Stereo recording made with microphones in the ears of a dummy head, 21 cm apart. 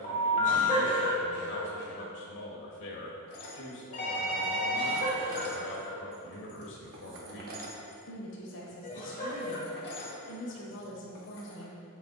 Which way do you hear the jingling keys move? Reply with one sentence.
You can hear the jingling keys move from left to right and back again.